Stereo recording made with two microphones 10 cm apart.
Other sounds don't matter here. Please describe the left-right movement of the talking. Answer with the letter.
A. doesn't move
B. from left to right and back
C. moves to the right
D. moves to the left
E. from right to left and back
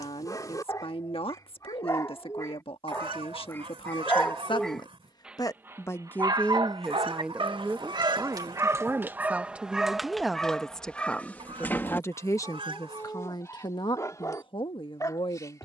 B.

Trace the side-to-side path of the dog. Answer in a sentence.
In this clip you hear the dog go right and come back.